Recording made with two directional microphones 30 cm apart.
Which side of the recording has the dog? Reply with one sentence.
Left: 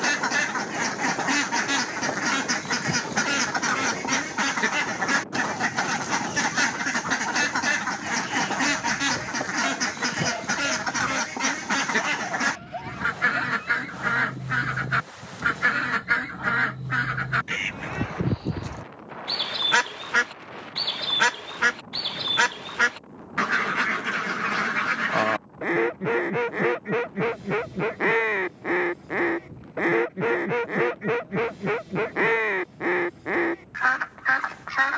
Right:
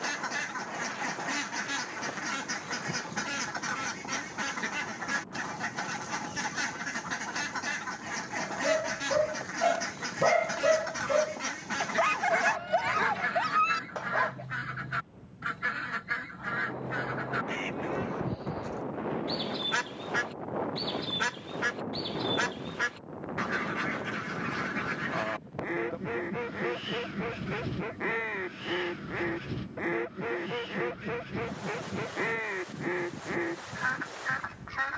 You can hear the dog on the right.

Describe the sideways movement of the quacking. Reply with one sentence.
You can hear the quacking stay in one place.